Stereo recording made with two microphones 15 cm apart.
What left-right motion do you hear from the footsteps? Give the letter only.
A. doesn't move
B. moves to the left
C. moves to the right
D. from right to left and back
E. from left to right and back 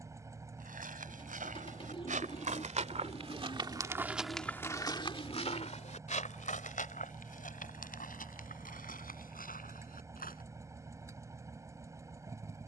B.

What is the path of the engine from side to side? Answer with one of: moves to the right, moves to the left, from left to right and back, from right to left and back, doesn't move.
doesn't move.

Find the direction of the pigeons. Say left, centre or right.
left.